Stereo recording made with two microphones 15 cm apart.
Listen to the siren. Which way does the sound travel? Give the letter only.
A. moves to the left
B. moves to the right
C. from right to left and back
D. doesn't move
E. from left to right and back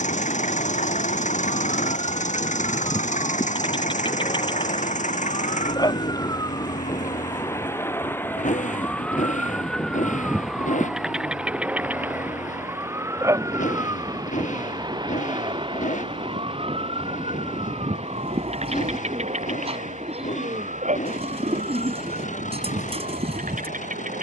B.